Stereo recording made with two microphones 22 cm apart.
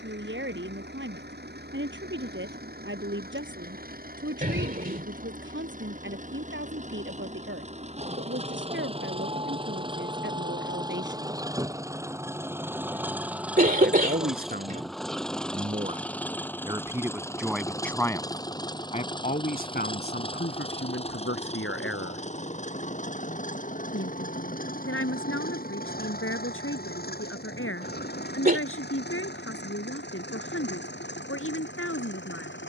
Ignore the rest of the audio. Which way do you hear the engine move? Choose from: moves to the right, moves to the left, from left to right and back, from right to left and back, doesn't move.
moves to the left.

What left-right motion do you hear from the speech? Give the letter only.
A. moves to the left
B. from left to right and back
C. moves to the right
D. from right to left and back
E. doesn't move
A.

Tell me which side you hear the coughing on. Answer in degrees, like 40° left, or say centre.
40° right.